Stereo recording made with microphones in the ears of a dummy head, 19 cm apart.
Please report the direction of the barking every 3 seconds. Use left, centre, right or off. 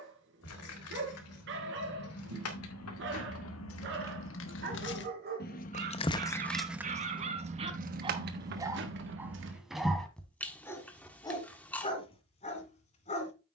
right, right, right, centre, left.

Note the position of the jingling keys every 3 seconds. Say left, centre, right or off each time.
left, left, right, right, off.